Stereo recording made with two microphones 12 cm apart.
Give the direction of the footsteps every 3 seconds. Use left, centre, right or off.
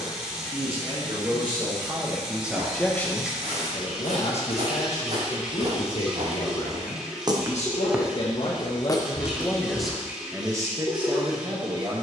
right, right, right, left.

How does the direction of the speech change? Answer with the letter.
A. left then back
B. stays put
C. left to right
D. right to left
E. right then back
A.